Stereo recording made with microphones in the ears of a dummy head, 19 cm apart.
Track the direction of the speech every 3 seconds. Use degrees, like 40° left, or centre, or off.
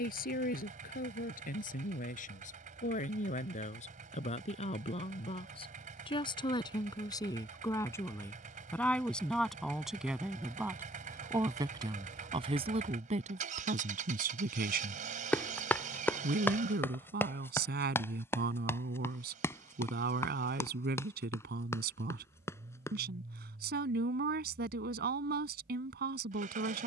40° left, 30° left, 20° left, 10° right, 40° right, 50° right, 50° right, 50° right, 50° right.